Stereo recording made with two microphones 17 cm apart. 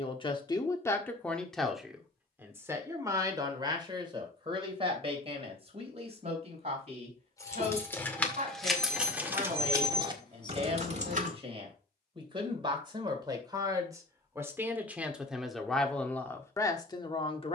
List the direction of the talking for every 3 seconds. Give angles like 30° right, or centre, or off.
10° left, 30° right, 40° right, 40° right, 20° right, 10° left.